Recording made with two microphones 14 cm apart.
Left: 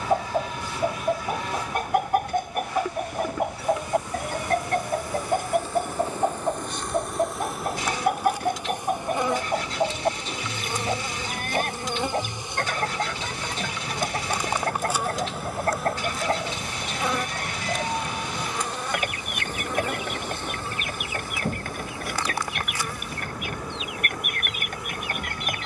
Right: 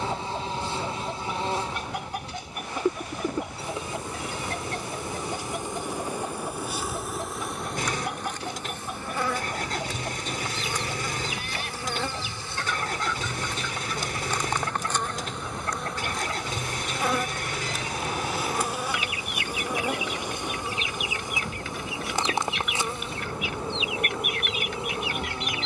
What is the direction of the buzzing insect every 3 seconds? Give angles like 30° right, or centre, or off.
30° right, 30° right, centre, 20° left, 10° left, centre, 10° right, 20° right, 30° right.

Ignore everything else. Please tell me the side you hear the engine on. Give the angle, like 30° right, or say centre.
50° right.